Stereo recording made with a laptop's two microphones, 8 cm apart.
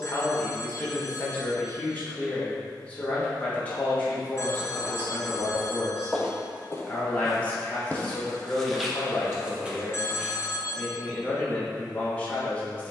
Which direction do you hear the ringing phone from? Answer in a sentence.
You can hear the ringing phone on the left.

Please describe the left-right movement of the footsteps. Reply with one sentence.
In this clip you hear the footsteps go left and come back.